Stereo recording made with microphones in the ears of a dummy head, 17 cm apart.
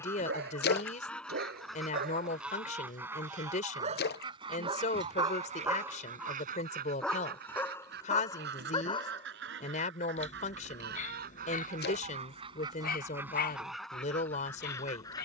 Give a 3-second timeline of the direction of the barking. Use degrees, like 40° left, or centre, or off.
60° right, 30° right, 10° left, 40° left, 50° left.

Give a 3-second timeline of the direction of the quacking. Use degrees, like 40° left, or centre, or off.
centre, 30° right, 60° right, 60° right, 10° right.